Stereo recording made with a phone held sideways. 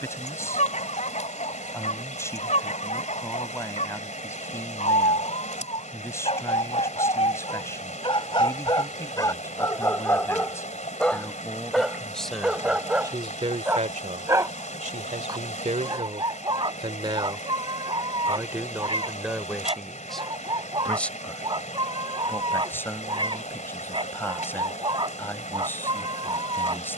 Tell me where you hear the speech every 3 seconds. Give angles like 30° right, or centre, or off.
20° left, 20° left, 20° left, 20° left, 40° right, 50° right, centre, 20° left, 20° left.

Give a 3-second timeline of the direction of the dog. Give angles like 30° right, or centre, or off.
60° left, 60° left, 40° left, 20° left, 10° right, 40° right, 40° right, 40° right, 40° right.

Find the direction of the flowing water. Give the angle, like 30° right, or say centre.
70° left.